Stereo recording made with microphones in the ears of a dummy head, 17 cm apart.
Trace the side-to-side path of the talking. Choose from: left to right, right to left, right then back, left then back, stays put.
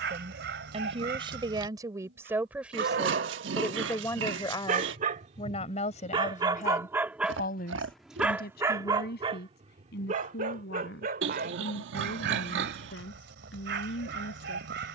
right to left.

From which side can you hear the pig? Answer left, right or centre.
right.